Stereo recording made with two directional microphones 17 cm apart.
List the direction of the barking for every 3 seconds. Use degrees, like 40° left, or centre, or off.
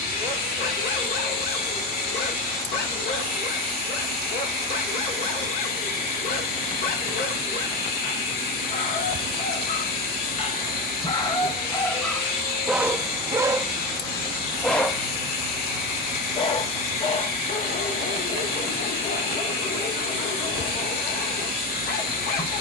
60° left, 60° left, 60° left, 30° left, centre, 30° left, 60° left, 60° left.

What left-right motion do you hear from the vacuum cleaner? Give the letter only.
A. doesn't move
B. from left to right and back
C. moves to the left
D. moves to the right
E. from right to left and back
A.